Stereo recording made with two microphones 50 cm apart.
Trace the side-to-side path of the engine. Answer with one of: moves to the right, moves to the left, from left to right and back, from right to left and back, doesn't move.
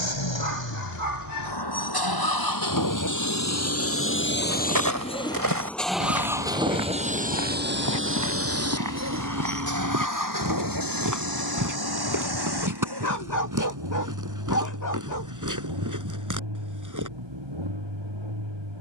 moves to the right.